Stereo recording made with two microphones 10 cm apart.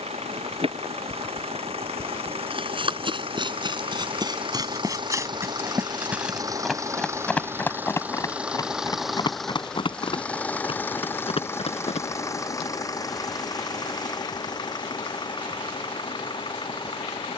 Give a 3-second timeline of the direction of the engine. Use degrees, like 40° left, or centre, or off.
70° right, 50° right, 20° right, 10° left, 40° left, 50° left.